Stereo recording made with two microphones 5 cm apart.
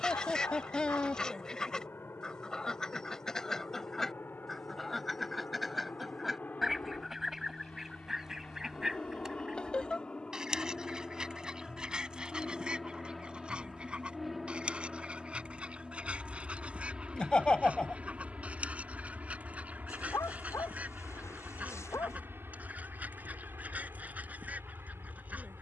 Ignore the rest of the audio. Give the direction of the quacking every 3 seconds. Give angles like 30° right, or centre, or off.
10° left, 10° left, 10° right, 10° right, 20° right, 20° right, 30° right, 30° right, 30° right.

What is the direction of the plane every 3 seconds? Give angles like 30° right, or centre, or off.
50° left, 40° left, 30° left, 20° left, centre, 10° right, 30° right, 40° right, 50° right.